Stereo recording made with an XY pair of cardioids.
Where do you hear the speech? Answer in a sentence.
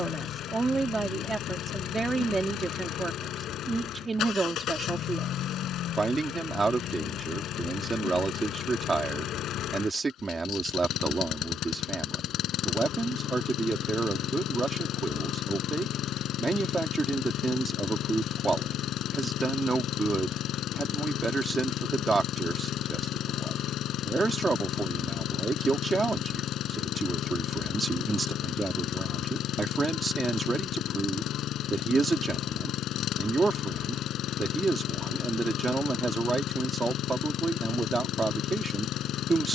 In this clip you hear the speech on the right.